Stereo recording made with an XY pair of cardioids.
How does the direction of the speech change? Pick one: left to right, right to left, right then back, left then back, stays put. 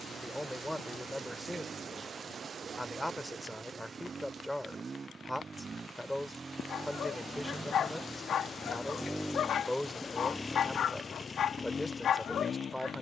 stays put.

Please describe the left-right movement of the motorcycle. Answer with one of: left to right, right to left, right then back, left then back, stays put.
right to left.